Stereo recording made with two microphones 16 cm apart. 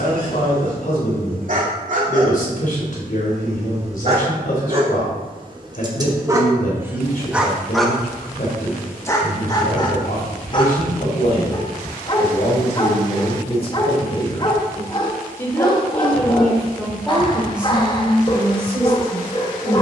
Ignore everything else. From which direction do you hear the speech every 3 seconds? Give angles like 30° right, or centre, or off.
60° left, 60° left, 60° left, 60° left, 40° left, centre, 20° right.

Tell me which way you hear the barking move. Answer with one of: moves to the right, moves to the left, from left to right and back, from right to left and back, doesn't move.
moves to the left.